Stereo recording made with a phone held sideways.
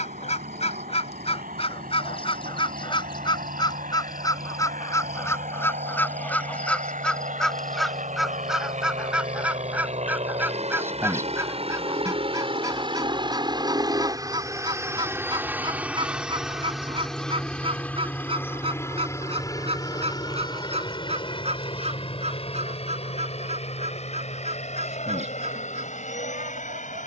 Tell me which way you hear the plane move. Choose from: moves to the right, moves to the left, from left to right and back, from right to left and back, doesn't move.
moves to the left.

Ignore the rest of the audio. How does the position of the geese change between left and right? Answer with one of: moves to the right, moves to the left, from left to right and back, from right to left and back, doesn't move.
moves to the right.